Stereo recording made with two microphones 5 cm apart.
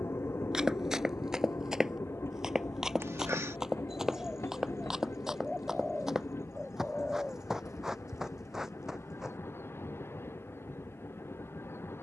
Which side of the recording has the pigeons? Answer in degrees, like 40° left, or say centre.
10° right.